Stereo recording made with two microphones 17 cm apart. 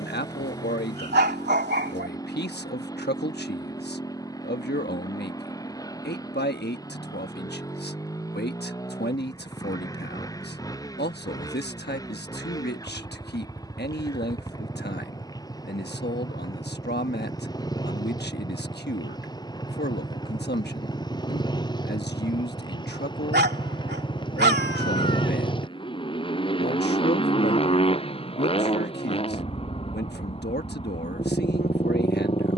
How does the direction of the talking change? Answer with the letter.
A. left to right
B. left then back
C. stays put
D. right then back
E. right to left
C.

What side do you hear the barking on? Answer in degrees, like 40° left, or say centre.
80° right.